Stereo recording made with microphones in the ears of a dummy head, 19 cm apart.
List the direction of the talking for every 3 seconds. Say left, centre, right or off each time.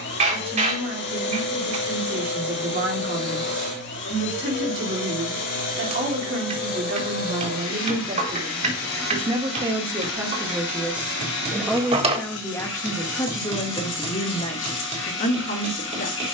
right, right, right, centre, left, left.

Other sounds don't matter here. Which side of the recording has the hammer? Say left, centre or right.
right.